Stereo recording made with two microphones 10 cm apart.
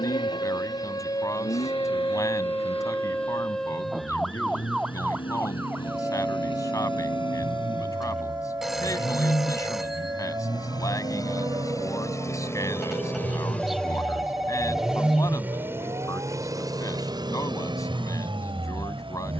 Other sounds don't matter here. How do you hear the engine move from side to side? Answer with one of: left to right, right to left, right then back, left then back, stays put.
left to right.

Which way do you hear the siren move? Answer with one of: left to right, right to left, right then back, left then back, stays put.
left to right.